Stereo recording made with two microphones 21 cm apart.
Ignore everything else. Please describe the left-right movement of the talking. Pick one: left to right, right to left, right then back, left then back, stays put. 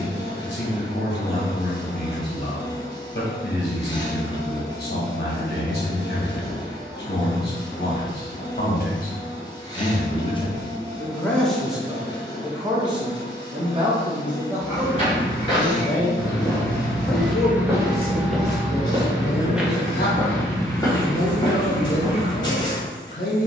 right then back.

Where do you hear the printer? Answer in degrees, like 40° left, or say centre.
20° left.